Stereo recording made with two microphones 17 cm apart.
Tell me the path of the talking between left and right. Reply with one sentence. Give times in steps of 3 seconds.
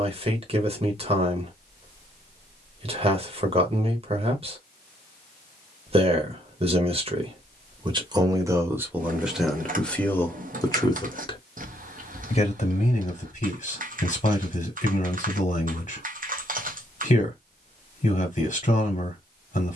In this clip you hear the talking on the right from 0 s, in the centre from 9 s and on the left from 12 s.